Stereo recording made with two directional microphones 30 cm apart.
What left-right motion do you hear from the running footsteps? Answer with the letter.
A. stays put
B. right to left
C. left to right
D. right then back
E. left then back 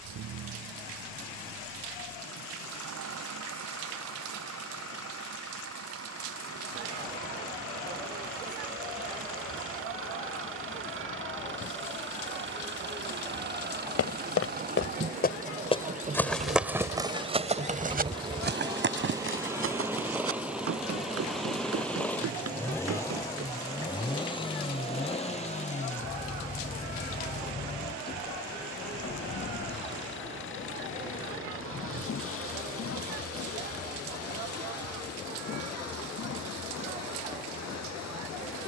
C.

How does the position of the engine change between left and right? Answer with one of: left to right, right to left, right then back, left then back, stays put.
right to left.